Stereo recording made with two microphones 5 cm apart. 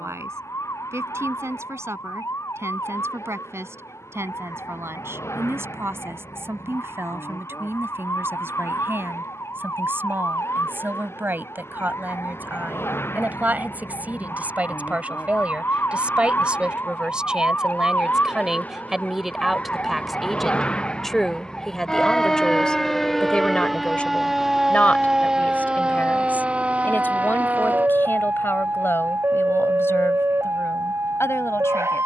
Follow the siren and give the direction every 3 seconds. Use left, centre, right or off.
left, left, left, left, left, left, left, centre, centre, right, right.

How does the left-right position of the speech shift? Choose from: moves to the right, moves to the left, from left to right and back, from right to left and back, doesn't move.
moves to the left.